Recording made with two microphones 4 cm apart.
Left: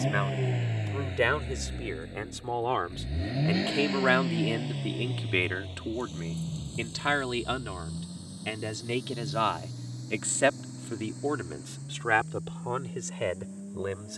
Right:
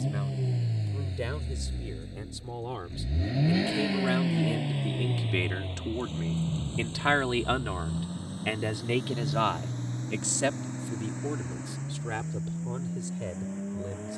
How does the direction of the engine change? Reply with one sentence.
In this clip you hear the engine move to the right.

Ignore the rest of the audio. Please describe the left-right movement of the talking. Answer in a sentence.
You can hear the talking go right and come back.